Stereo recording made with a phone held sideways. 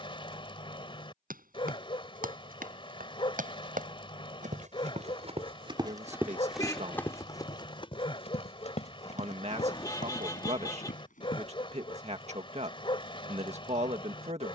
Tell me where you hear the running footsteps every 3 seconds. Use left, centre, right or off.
right, right, left, left, off.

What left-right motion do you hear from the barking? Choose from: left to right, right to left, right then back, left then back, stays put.
stays put.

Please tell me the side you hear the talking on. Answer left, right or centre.
right.